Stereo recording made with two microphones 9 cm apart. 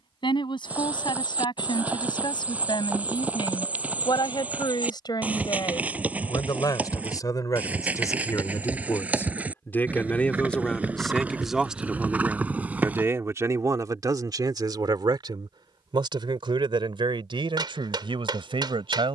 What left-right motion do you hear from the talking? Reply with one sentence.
In this clip you hear the talking go from the left side to the right.